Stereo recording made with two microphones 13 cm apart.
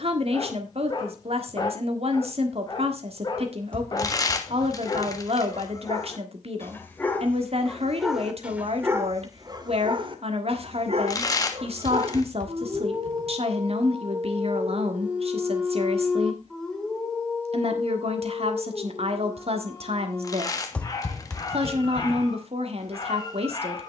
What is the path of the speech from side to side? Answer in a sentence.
In this clip you hear the speech stay in one place.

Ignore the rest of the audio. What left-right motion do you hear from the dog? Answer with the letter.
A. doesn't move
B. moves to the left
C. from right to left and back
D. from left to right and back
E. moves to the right
D.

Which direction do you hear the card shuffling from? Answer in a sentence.
In this clip you hear the card shuffling on the left.